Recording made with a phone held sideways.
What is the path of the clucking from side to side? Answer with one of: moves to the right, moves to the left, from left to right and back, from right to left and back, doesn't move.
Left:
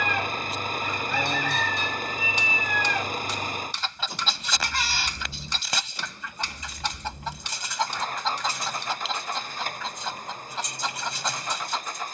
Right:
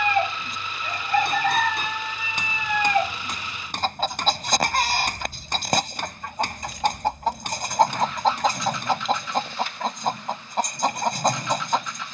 doesn't move.